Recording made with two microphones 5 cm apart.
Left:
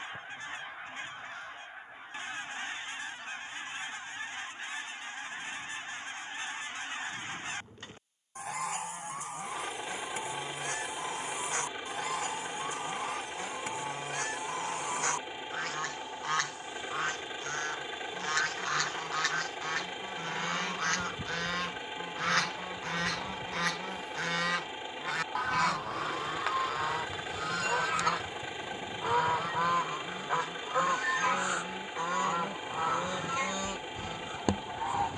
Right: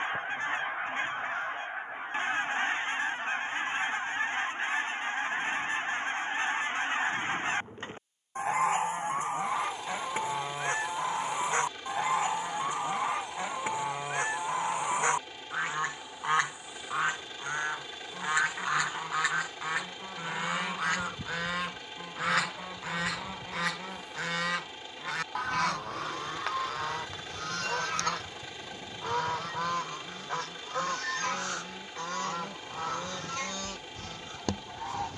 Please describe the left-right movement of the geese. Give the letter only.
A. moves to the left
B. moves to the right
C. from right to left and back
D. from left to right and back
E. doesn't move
A.